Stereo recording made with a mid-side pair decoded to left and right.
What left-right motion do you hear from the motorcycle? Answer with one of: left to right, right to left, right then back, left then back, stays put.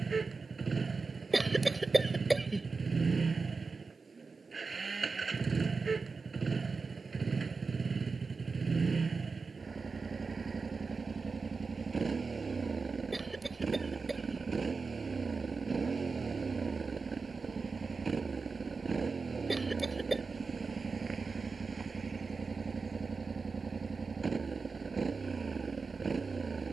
stays put.